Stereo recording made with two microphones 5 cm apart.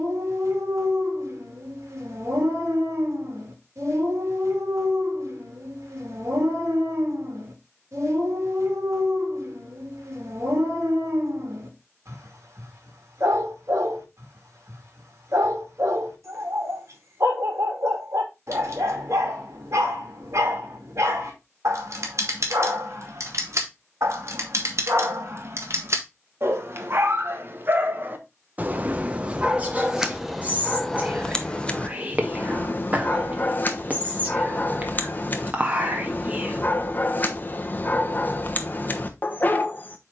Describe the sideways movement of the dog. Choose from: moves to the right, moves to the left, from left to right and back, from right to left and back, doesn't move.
moves to the left.